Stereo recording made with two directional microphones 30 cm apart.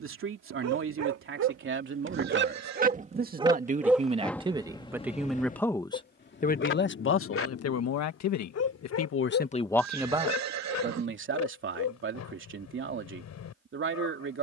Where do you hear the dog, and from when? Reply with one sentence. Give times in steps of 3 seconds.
In this clip you hear the dog on the right from 0 s, in the centre from 3 s and on the left from 6 s.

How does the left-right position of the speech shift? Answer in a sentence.
In this clip you hear the speech go left and come back.